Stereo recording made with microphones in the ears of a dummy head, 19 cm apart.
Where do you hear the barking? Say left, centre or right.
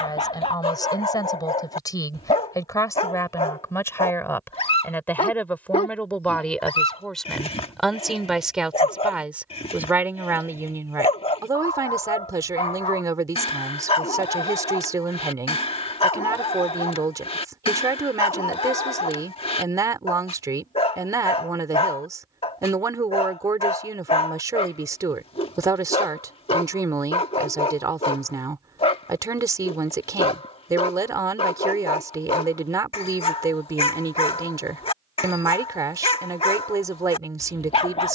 left.